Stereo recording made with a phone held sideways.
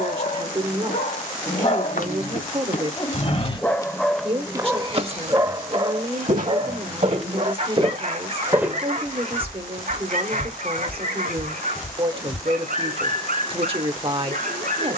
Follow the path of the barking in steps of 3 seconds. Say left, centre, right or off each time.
left, centre, right, right, right.